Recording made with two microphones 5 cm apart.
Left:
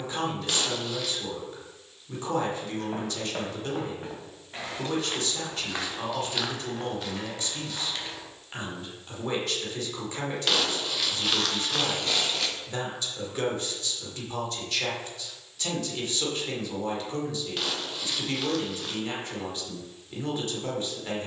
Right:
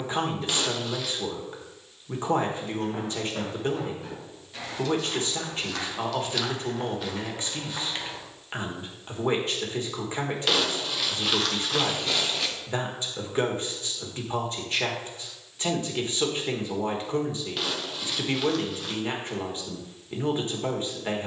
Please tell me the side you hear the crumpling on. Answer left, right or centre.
centre.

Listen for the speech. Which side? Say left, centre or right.
right.